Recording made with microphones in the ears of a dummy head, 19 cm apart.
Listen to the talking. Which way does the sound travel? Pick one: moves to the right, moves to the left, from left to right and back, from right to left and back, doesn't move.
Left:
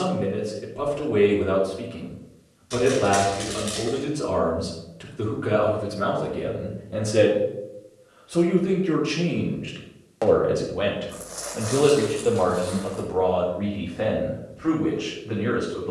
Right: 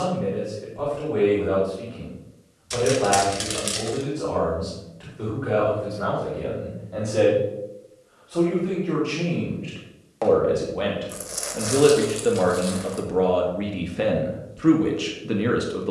moves to the right.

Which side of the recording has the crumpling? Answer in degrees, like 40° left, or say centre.
30° right.